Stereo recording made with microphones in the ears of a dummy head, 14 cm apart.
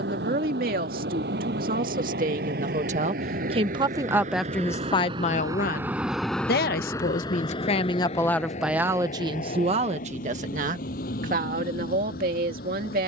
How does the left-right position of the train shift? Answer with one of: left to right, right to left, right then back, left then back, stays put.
right to left.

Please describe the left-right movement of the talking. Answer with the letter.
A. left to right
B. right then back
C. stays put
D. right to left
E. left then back
E.